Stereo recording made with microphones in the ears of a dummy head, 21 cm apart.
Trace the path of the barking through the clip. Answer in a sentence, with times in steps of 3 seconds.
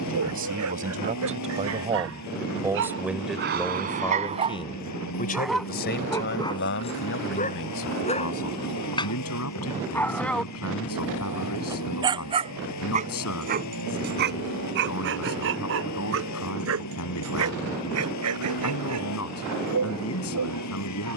You can hear the barking on the right from 0 s, on the left from 6 s, in the centre from 9 s and on the right from 12 s.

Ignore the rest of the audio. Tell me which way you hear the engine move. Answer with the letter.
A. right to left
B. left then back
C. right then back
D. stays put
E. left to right
D.